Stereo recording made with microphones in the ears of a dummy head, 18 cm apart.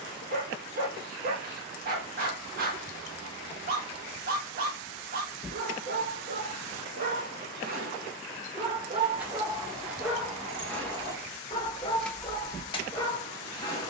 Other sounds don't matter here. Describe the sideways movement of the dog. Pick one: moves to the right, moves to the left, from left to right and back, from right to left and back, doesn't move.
moves to the left.